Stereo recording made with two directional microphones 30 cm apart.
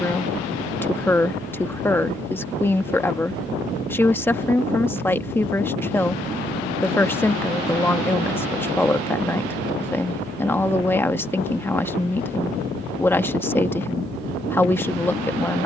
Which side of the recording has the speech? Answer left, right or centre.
centre.